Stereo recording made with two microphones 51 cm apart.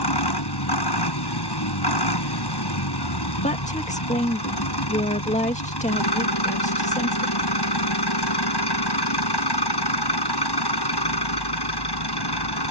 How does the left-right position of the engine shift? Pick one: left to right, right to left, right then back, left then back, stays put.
stays put.